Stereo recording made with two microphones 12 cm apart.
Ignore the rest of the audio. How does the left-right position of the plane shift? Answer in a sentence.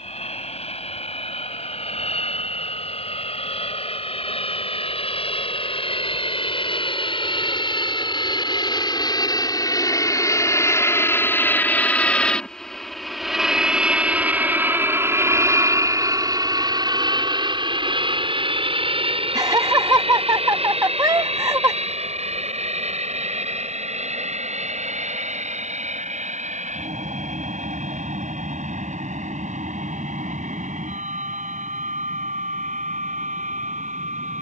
You can hear the plane move to the right.